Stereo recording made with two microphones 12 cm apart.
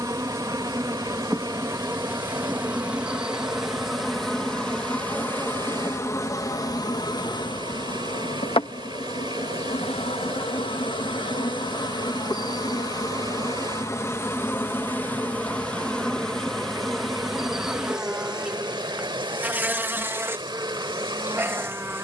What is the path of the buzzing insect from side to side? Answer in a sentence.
In this clip you hear the buzzing insect move from right to left and back again.